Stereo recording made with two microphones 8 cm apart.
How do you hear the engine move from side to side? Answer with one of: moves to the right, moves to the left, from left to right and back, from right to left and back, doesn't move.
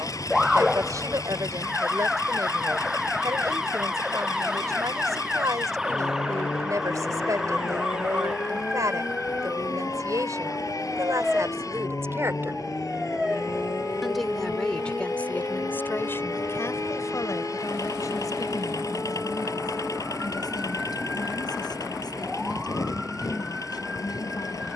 doesn't move.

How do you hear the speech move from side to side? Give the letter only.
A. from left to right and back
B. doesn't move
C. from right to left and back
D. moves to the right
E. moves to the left
E.